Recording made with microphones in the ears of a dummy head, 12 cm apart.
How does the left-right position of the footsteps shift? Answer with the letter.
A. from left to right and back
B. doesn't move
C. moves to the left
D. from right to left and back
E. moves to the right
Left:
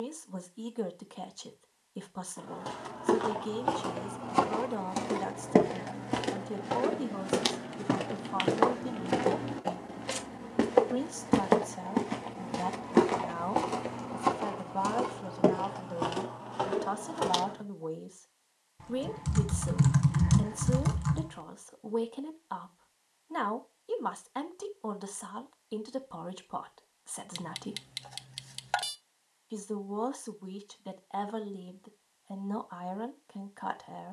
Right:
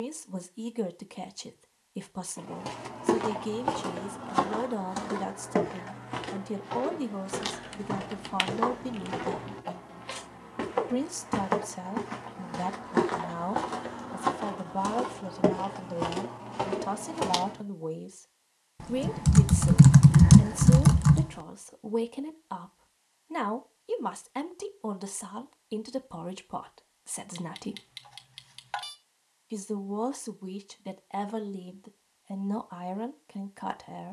D.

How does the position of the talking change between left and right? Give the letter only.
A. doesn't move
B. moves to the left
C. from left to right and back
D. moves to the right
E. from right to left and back
A.